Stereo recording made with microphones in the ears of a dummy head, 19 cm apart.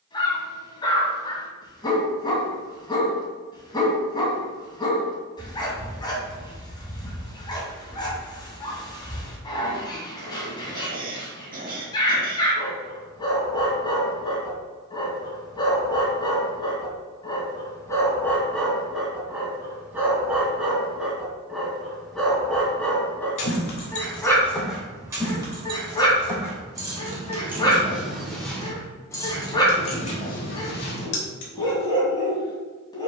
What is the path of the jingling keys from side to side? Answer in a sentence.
You can hear the jingling keys move from left to right and back again.